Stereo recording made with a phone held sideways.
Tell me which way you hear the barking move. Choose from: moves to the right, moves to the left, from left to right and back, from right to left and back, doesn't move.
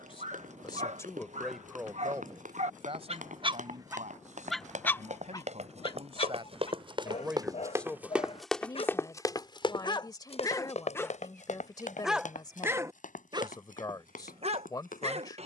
from right to left and back.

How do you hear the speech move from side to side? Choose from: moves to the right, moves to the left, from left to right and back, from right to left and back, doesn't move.
from left to right and back.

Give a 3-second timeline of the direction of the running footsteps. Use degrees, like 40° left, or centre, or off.
70° right, 60° right, 20° right, 50° left, 70° left.